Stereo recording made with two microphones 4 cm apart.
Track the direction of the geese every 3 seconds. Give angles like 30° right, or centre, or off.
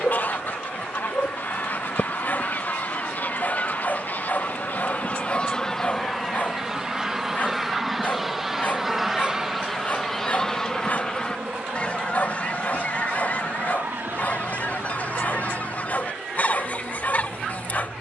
50° left, 40° left, 10° right, 10° left, 40° left, 40° left.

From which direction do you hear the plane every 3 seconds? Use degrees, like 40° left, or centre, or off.
40° left, 30° left, centre, 30° right, 50° right, 60° right.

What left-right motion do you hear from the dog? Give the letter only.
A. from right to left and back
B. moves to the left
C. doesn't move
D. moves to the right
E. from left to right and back
C.